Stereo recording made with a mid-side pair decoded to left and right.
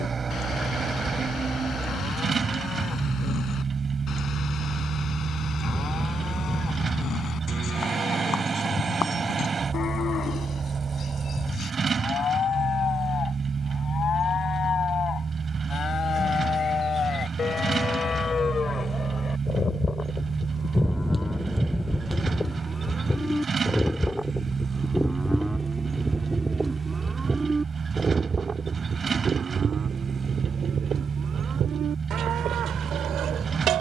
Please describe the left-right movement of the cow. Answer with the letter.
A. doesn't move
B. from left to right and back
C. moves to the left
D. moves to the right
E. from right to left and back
D.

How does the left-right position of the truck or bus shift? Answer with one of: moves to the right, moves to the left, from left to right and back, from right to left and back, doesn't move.
doesn't move.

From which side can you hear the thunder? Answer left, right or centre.
centre.